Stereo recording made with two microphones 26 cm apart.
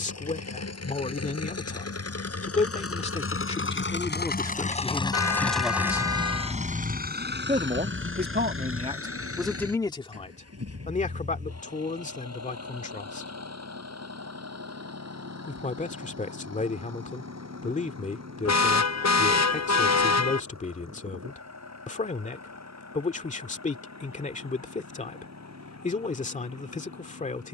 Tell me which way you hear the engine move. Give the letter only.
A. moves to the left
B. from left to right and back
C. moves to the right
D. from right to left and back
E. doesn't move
C.